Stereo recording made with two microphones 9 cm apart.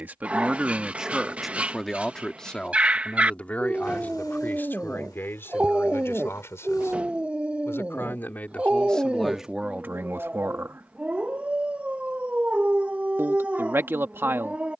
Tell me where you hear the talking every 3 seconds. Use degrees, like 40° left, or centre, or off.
centre, 20° left, 20° left, 20° right, 30° right.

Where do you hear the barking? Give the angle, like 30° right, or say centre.
10° right.